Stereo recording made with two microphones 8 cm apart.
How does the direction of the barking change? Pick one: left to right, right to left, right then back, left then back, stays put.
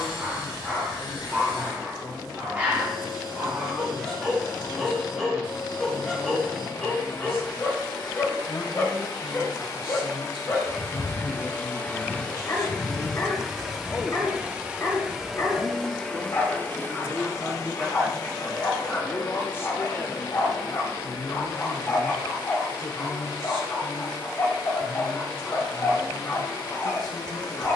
right to left.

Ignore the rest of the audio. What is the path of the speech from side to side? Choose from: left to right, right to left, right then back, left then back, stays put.
right then back.